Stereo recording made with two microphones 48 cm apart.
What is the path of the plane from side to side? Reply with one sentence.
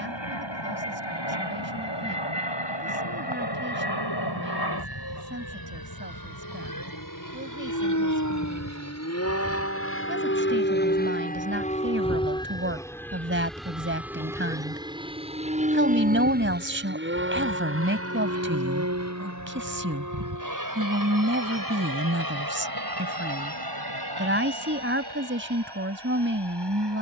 In this clip you hear the plane travel towards the right.